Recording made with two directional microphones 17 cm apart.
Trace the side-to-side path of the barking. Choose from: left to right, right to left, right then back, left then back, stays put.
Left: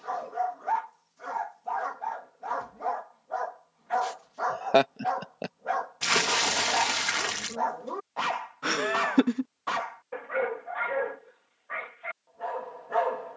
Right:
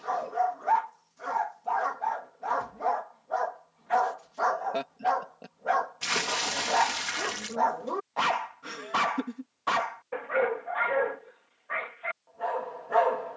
stays put.